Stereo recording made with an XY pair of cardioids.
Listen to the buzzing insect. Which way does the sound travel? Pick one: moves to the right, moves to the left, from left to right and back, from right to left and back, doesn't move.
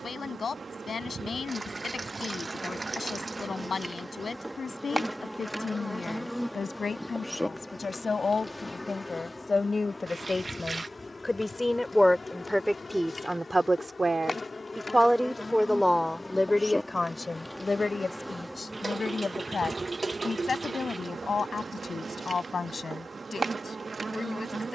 from right to left and back.